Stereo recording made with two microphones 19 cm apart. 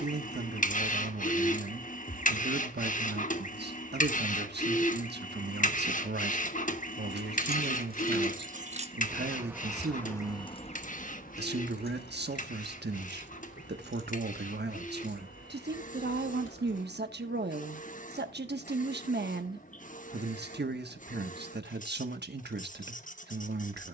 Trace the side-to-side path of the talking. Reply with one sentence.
You can hear the talking stay in one place.